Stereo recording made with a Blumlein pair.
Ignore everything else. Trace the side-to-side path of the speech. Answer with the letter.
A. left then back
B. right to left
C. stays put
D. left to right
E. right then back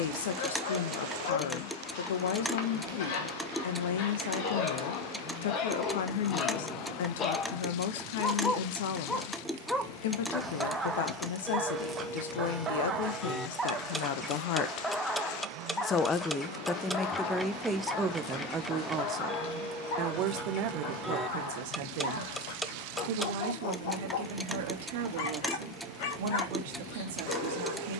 D.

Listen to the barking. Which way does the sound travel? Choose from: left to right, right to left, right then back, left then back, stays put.
right then back.